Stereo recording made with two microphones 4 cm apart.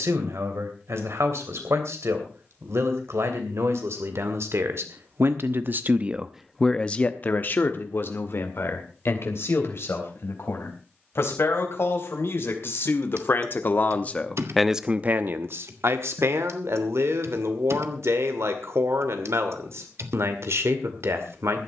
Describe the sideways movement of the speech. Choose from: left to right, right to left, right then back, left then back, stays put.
left then back.